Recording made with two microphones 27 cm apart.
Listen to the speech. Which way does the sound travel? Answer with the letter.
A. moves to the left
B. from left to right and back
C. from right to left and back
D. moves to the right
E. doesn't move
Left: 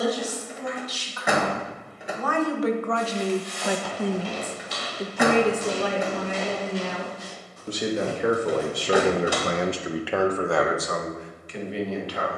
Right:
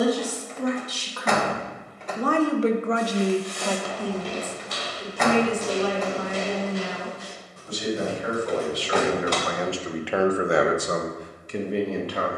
C.